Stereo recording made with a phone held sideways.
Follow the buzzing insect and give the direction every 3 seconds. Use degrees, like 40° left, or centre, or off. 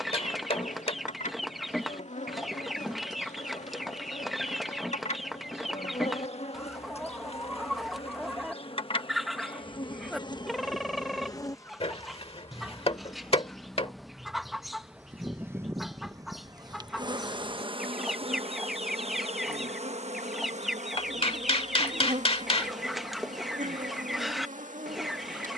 60° left, 60° left, 50° left, 30° left, centre, 30° right, 50° right, 70° right, 70° right.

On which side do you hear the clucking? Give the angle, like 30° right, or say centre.
centre.